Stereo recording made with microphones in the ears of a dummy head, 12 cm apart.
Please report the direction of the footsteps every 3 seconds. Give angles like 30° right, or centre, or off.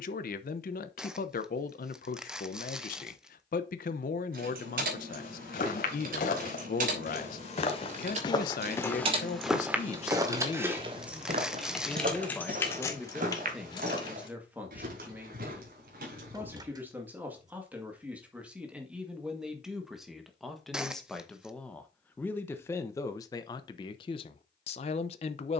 off, 70° left, 40° left, 30° right, 60° right, 70° right, off, off, off.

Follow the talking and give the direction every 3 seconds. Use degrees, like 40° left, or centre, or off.
70° left, 70° left, 70° left, 40° left, centre, 10° right, 10° right, 20° left, 40° left.